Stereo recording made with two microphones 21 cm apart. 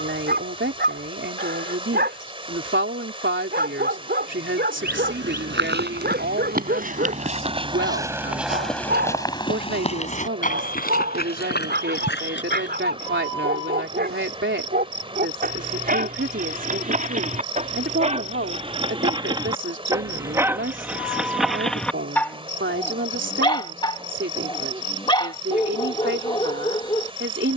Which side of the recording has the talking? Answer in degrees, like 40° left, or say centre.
70° right.